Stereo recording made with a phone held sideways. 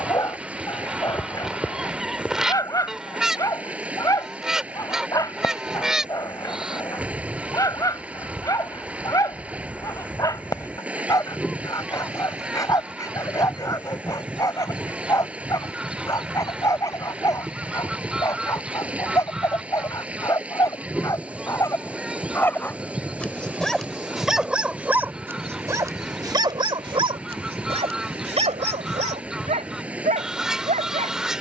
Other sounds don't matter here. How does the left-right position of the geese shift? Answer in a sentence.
In this clip you hear the geese stay in one place.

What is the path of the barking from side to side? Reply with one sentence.
In this clip you hear the barking move to the right.